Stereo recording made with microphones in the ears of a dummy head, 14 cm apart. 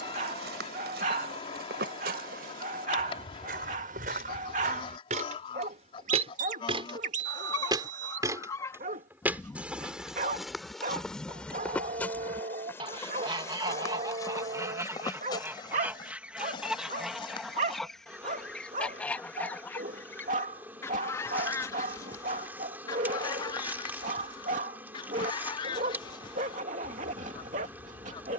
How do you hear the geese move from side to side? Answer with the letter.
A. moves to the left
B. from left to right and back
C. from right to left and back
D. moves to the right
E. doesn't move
B.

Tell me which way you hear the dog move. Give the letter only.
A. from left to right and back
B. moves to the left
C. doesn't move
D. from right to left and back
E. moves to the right
C.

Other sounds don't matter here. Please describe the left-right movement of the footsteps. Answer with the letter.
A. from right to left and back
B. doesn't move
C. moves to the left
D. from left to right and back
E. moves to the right
C.